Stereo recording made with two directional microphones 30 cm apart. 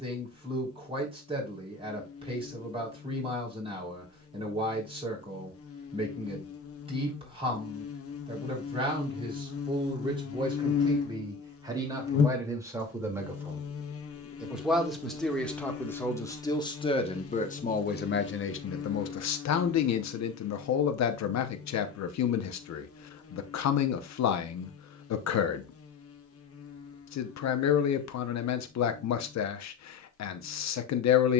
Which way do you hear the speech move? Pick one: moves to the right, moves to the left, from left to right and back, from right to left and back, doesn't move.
moves to the left.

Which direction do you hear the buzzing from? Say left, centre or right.
left.